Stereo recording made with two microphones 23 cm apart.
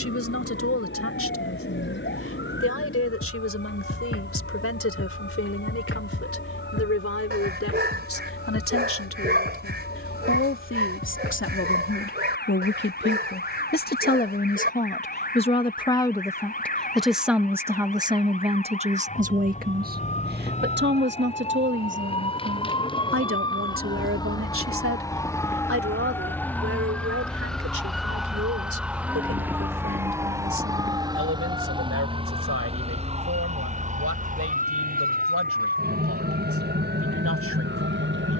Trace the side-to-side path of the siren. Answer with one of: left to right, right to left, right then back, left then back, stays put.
left to right.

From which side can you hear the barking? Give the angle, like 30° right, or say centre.
50° right.